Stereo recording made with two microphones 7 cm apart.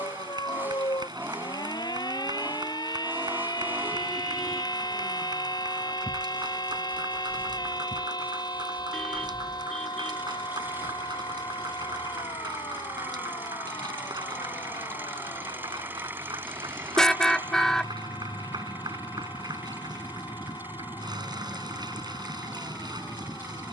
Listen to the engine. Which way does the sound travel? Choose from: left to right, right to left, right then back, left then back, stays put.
stays put.